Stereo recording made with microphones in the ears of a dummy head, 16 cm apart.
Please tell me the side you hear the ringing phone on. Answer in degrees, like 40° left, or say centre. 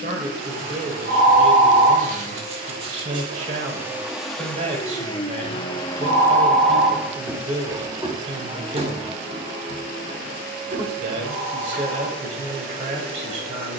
50° right.